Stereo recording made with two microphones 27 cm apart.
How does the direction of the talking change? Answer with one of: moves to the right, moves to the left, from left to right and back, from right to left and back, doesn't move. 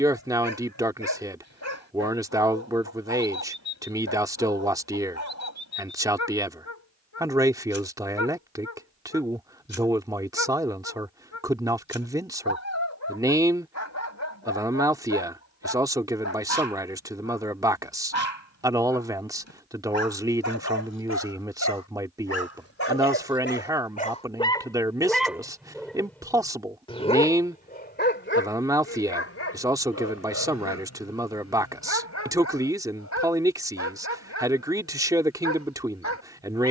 doesn't move.